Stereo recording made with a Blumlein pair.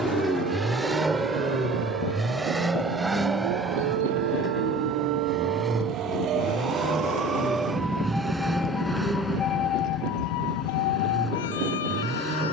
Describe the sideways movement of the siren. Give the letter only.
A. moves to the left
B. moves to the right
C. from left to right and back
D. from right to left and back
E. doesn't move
A.